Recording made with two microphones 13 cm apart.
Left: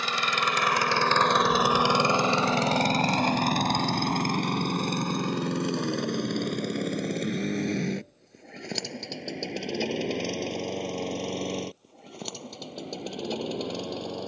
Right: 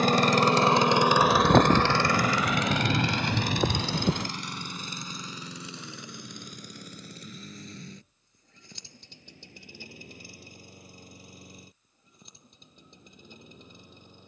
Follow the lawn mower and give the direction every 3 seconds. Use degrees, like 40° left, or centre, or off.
centre, 50° left, 70° left, 70° left, 70° left.